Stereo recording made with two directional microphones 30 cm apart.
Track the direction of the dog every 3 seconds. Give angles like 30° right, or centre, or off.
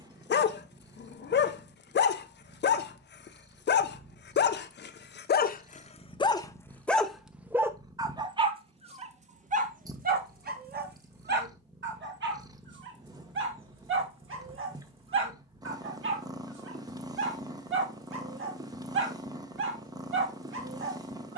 40° left, 30° left, centre, 30° right, 40° right, 40° right, 40° right.